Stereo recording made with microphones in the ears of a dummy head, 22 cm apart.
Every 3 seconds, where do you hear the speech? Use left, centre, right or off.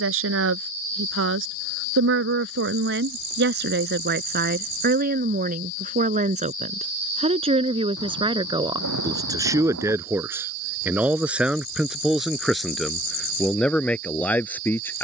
right, right, right, centre, centre.